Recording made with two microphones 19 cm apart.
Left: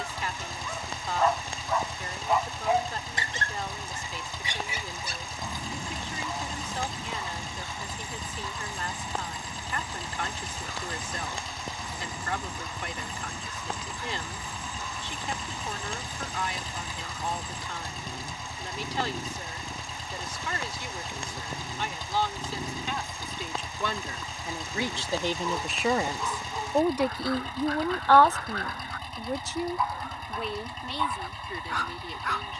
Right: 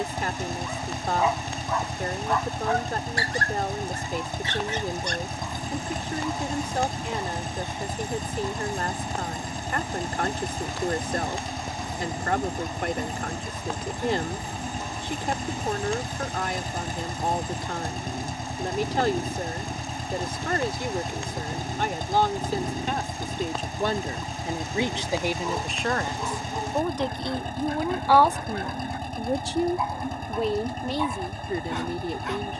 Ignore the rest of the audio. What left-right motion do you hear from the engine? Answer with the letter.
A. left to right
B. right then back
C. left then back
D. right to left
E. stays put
E.